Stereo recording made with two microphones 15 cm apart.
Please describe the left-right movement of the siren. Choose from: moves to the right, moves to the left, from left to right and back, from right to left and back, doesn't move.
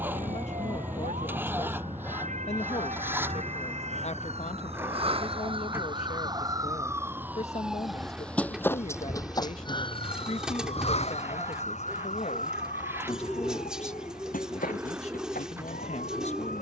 moves to the left.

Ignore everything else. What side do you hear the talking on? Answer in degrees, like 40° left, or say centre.
50° left.